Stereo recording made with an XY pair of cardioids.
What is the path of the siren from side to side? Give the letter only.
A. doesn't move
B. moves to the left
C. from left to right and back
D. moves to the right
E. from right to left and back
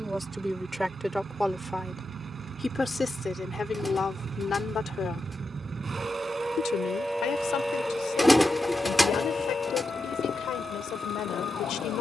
B.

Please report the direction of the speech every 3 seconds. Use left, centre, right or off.
centre, left, left, left.